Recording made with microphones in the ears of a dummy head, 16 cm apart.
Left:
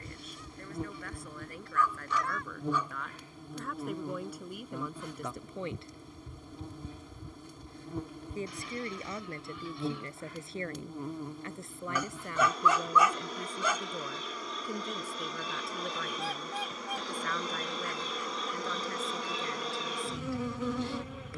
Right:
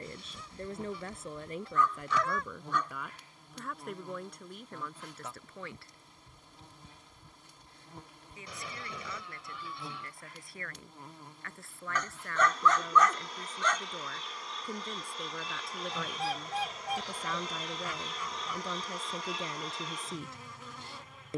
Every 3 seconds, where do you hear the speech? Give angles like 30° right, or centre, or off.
20° right, 10° left, 30° left, 20° left, 10° left, centre, 20° right.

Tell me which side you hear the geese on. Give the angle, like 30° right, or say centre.
70° right.